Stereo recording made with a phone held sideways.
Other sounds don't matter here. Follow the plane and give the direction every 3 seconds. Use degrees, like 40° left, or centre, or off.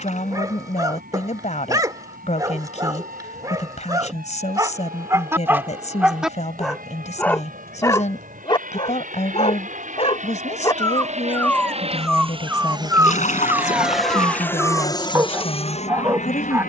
70° right, 70° right, 70° right, 50° right, 10° right, 40° left.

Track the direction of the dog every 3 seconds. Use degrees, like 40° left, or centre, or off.
20° right, 20° right, 10° left, 20° left, 10° right, 20° right.